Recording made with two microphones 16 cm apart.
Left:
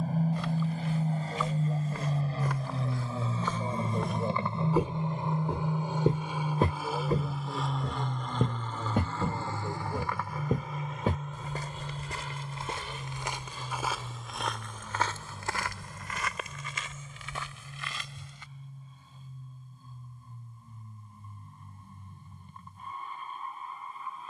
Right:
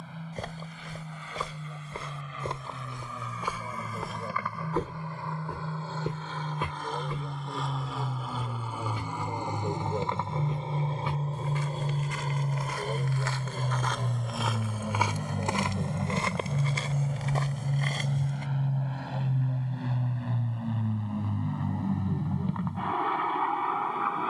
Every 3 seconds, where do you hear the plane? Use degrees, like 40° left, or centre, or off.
40° left, 30° left, centre, 30° right, 50° right, 60° right, 70° right, 80° right.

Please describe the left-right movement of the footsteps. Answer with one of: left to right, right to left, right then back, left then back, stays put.
left then back.